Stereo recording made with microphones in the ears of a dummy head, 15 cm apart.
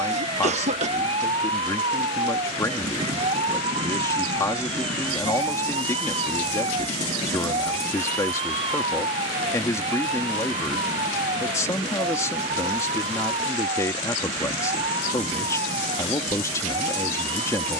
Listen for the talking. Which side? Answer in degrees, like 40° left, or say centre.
20° left.